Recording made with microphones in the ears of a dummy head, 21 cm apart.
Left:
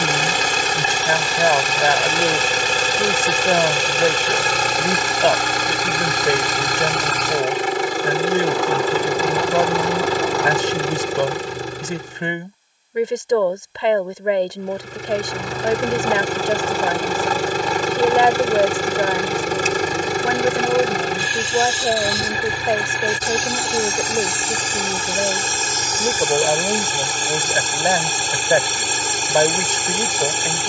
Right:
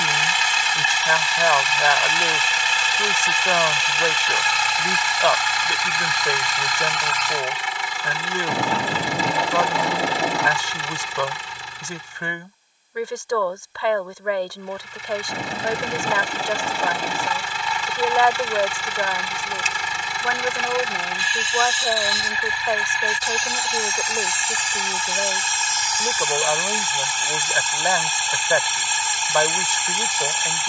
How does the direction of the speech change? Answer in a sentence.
In this clip you hear the speech stay put.